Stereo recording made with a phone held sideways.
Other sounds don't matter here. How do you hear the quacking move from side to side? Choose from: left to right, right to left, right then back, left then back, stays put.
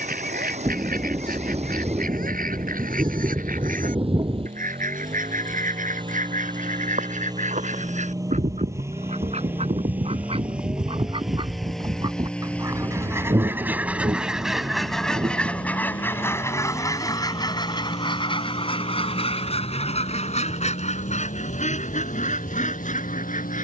right to left.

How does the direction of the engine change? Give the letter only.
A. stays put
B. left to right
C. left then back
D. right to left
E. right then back
D.